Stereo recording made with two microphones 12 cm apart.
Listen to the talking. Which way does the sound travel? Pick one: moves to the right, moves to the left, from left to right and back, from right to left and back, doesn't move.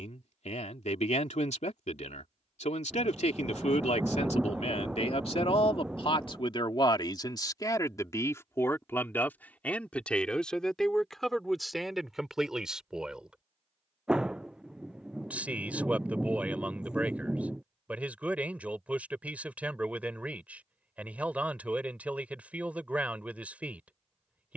moves to the right.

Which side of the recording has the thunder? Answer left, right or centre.
centre.